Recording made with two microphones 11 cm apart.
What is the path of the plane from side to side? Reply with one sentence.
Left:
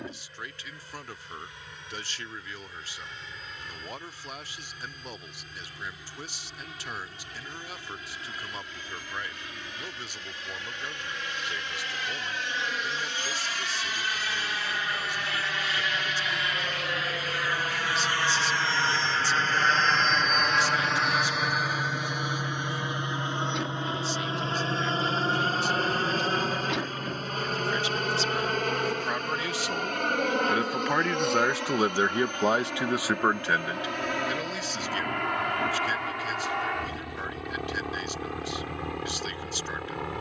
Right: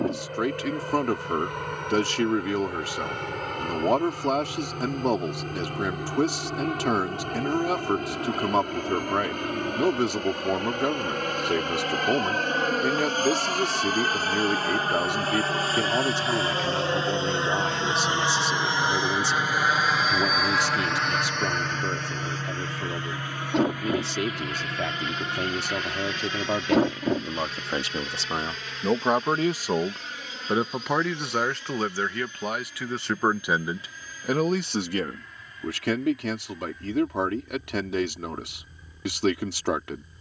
You can hear the plane move from right to left.